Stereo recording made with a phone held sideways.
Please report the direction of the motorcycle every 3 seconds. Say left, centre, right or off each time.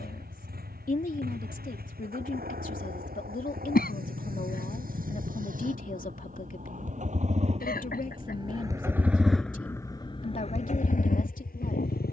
right, right, right, left.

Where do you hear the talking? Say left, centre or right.
left.